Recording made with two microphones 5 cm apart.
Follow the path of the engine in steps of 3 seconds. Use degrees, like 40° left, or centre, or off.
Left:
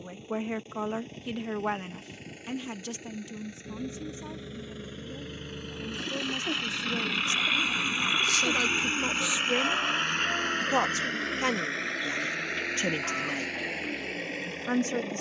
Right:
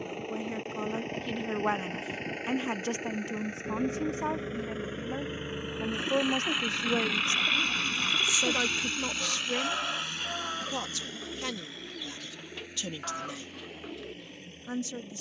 50° right, 30° right, centre, 50° left, 70° left.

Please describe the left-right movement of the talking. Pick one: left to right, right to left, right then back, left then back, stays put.
right then back.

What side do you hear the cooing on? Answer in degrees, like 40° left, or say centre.
centre.